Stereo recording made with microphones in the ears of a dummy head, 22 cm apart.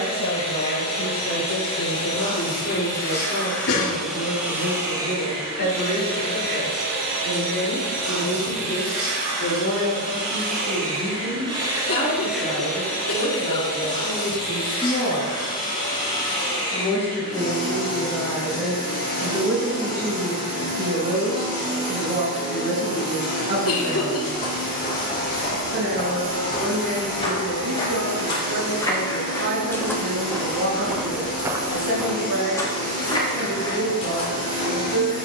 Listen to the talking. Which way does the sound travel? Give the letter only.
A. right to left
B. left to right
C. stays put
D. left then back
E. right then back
B.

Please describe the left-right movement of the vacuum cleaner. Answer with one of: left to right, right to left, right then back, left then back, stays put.
right then back.